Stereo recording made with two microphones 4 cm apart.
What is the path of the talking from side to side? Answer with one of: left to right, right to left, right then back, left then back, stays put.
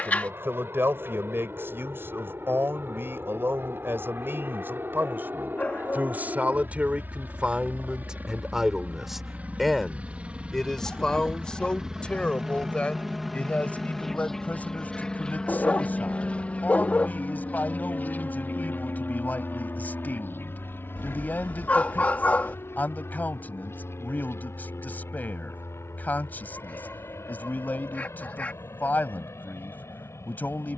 right to left.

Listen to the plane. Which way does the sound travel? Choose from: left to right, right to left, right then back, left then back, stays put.
right to left.